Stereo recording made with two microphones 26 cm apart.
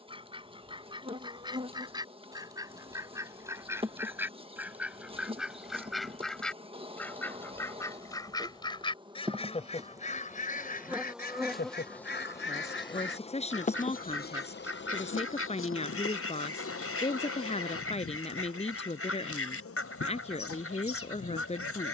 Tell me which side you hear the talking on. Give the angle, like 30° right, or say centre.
30° left.